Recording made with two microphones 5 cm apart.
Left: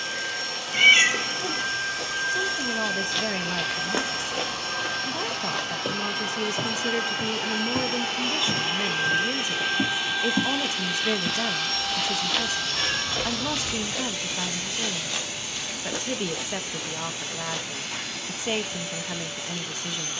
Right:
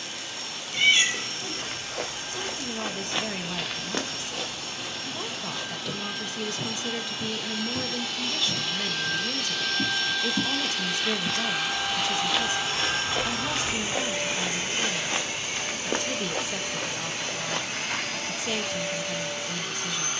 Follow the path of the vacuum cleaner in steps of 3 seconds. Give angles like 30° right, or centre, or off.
70° left, 70° left, 50° left, 10° left, 30° right, 50° right, 60° right.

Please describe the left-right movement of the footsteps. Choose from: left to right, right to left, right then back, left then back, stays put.
left then back.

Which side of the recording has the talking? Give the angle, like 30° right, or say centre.
20° left.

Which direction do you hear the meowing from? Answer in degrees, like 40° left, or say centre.
40° left.